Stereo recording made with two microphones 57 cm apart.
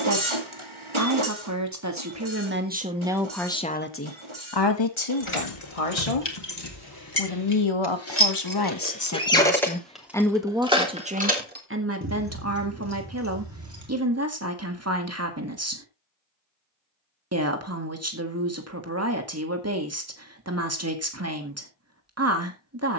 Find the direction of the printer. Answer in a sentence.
In this clip you hear the printer on the right.